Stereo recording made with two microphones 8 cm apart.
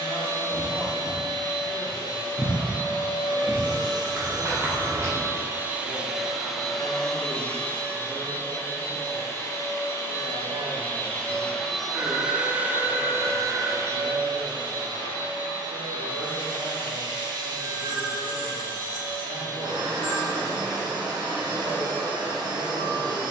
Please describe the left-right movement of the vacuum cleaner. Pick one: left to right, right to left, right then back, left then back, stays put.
left then back.